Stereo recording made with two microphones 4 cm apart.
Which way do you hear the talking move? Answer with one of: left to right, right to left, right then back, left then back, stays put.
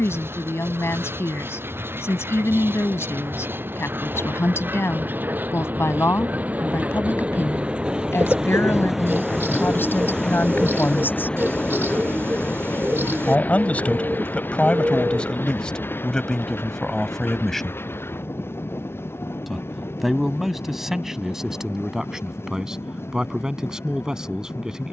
left to right.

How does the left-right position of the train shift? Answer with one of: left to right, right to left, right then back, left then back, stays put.
right to left.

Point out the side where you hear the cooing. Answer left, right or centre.
right.